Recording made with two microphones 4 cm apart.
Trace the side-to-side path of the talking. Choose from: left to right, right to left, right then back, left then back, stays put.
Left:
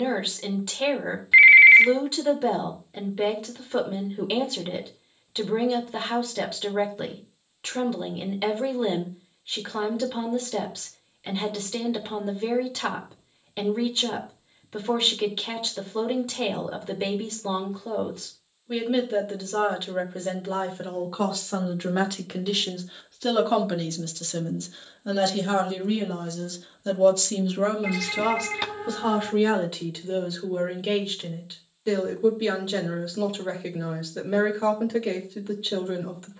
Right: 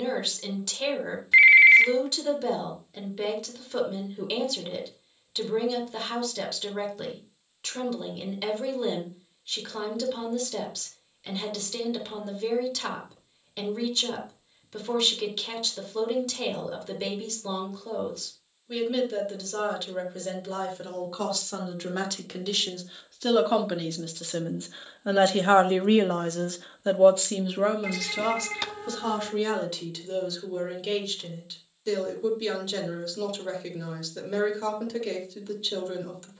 right then back.